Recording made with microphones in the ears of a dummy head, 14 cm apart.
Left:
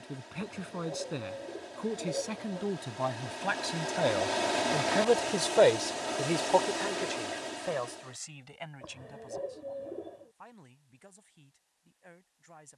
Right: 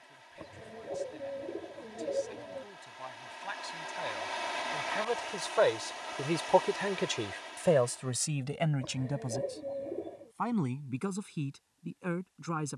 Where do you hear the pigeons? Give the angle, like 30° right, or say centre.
10° right.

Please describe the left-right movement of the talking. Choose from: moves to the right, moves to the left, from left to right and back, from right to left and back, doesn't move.
moves to the right.